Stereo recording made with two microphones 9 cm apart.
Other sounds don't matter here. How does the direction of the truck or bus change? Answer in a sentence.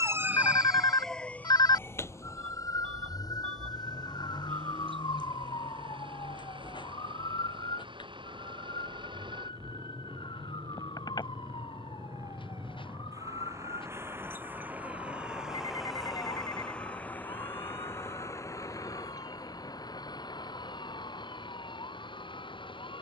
You can hear the truck or bus move from right to left.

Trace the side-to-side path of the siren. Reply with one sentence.
In this clip you hear the siren go from the right side to the left.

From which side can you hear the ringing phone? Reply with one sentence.
You can hear the ringing phone on the left.